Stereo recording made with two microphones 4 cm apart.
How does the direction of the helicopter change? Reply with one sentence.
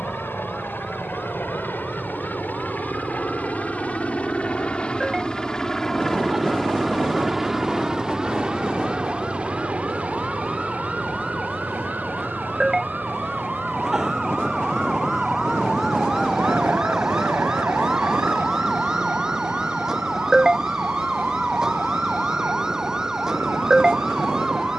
In this clip you hear the helicopter move to the right.